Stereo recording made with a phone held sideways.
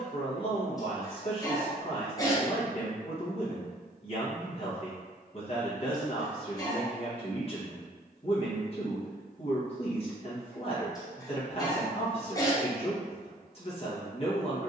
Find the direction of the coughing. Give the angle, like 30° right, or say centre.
20° left.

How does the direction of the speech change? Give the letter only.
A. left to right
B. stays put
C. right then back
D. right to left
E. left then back
B.